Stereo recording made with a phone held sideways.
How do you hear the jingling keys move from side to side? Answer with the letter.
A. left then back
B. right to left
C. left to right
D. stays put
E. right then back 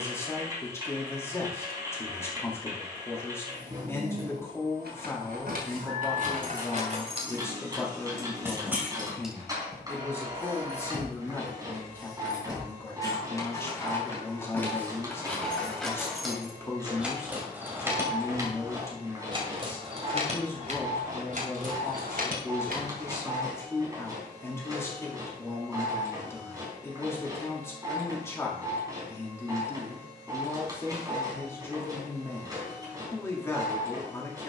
A.